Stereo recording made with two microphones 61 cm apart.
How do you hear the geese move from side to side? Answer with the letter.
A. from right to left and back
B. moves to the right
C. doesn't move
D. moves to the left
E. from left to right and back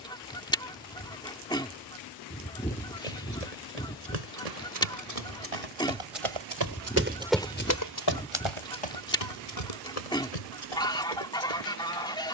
C.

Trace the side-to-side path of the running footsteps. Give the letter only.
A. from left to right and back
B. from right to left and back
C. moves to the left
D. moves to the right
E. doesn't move
C.